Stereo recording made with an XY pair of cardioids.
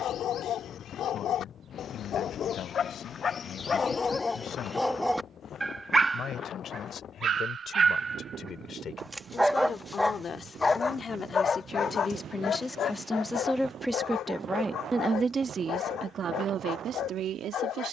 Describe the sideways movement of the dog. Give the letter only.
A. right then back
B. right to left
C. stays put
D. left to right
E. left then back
A.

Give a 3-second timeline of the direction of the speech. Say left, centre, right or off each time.
left, left, left, left, centre, right.